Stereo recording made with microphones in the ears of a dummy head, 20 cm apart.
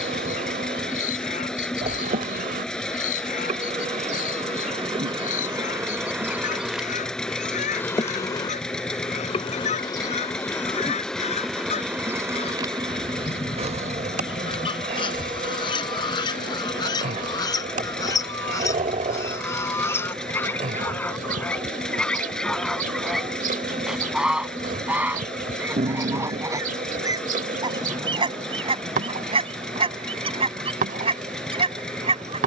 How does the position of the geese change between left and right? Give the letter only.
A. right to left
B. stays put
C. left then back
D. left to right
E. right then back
D.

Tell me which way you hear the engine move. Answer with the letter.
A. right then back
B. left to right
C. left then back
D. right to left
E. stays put
E.